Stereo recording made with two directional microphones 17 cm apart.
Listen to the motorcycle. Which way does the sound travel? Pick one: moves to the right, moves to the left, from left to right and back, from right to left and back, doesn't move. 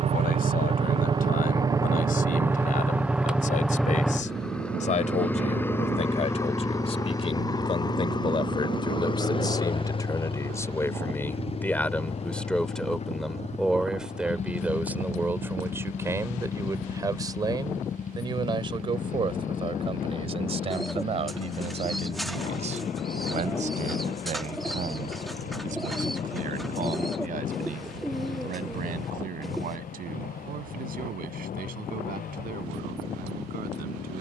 moves to the left.